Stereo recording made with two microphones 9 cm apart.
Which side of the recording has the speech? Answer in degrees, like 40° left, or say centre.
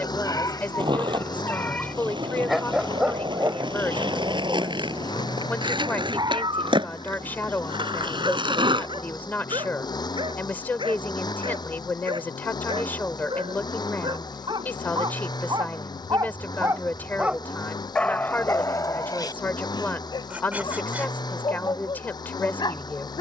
20° left.